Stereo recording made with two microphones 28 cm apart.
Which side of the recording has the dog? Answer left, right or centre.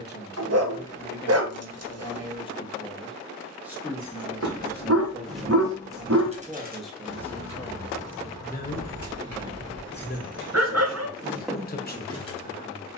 right.